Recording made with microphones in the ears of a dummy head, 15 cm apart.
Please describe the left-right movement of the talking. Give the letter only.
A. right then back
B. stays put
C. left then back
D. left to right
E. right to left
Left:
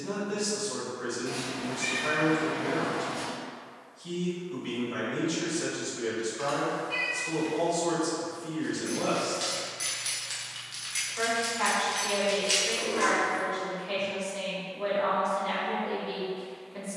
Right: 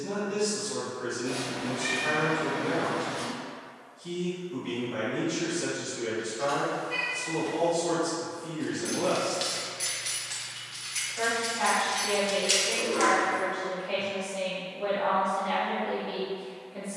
B.